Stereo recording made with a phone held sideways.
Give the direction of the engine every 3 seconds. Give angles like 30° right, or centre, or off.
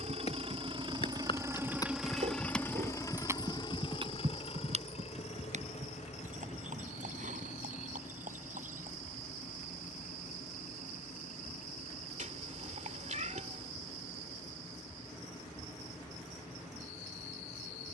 20° right, 50° left, 70° left, 70° left, 80° left, 80° left.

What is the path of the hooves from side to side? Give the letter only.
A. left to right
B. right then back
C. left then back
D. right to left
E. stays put
A.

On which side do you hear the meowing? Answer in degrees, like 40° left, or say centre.
70° right.